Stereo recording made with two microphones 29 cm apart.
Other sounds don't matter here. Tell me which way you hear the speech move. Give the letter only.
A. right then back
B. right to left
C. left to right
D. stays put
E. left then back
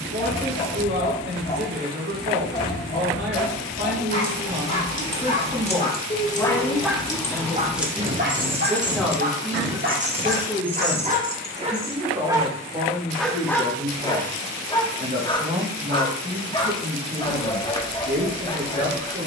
E.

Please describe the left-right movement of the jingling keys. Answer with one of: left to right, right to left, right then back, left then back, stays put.
right then back.